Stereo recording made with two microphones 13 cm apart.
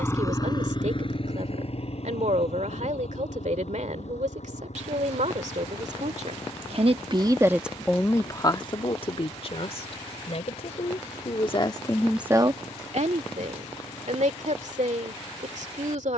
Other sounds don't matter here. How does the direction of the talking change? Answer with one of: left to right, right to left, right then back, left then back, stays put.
left then back.